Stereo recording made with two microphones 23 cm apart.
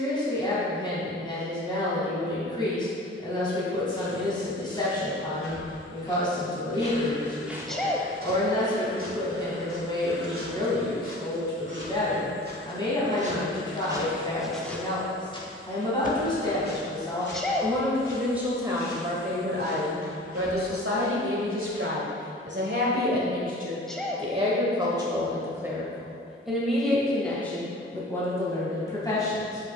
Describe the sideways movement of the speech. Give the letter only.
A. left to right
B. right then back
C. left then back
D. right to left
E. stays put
B.